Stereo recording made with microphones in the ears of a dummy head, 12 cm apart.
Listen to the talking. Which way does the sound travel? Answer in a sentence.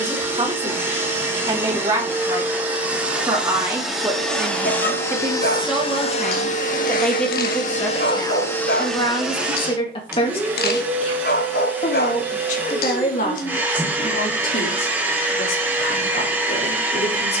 You can hear the talking travel towards the left.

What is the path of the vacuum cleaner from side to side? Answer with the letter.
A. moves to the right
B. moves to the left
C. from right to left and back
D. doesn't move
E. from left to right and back
C.